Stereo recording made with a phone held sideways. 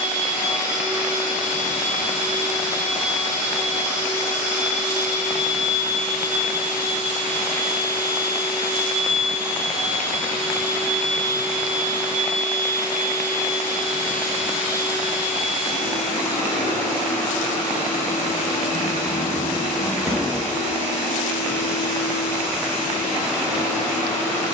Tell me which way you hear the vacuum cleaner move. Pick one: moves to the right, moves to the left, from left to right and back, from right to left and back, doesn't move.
doesn't move.